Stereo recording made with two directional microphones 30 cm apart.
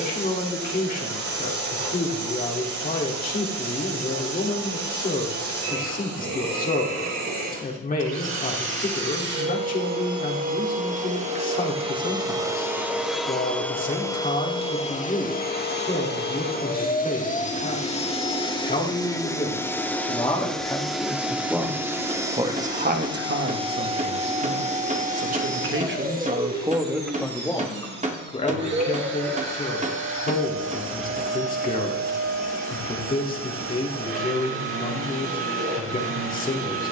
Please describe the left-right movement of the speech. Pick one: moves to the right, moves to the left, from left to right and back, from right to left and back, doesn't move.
from left to right and back.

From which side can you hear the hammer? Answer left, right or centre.
right.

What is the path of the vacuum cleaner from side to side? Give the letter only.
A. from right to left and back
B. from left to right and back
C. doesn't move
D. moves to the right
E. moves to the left
A.